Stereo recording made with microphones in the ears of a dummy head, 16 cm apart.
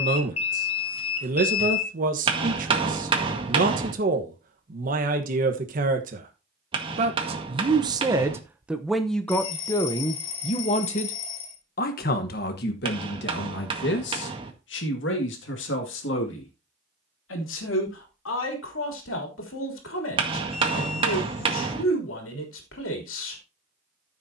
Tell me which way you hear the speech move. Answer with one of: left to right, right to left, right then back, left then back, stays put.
right to left.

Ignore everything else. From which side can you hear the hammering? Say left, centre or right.
right.